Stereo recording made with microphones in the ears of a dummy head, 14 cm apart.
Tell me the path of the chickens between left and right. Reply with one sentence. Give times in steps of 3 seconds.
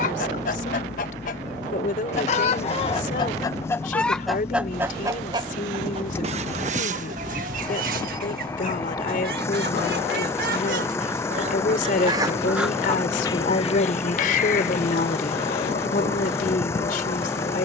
You can hear the chickens on the left from 0 s, in the centre from 3 s, on the right from 6 s and on the left from 12 s.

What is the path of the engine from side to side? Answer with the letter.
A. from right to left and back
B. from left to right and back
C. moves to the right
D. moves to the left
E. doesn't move
E.